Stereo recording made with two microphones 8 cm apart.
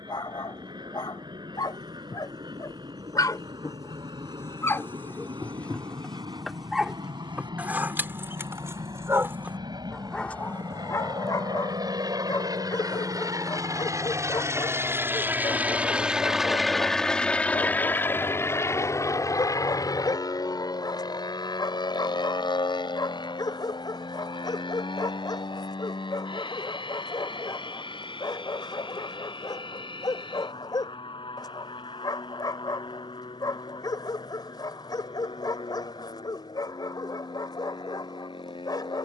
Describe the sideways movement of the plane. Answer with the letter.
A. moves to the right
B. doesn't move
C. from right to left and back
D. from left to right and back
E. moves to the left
E.